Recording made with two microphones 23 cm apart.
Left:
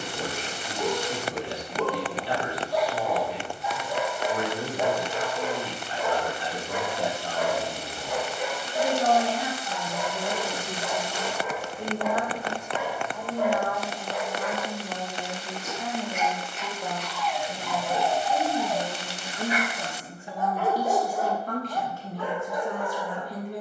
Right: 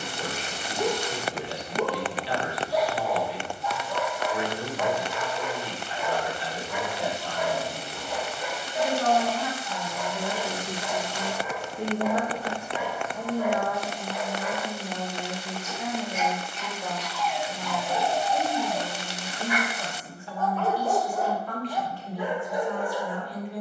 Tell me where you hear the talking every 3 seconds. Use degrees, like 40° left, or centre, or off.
50° left, 50° left, 40° left, centre, 20° right, centre, 30° left, 40° left.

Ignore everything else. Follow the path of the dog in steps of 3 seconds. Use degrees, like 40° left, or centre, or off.
20° right, 20° left, 60° left, 70° left, 70° left, 60° left, 30° left, 20° right.